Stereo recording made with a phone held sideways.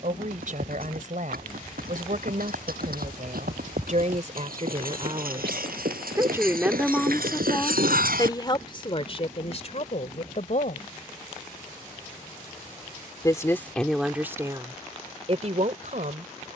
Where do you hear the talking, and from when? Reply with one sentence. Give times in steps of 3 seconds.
You can hear the talking on the right from 0 s, in the centre from 6 s, on the left from 9 s, in the centre from 12 s and on the right from 15 s.